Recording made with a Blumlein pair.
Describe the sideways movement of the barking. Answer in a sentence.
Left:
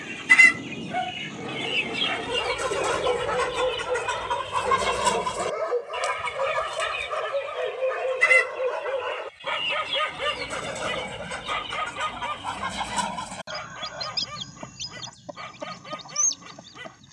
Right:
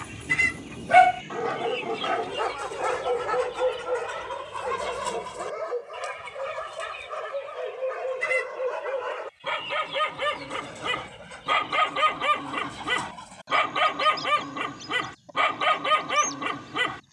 You can hear the barking go left and come back.